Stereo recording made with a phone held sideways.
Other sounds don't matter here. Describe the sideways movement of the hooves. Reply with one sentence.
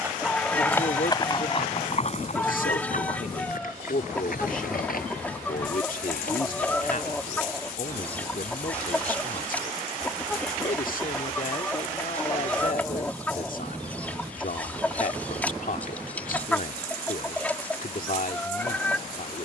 You can hear the hooves travel towards the left.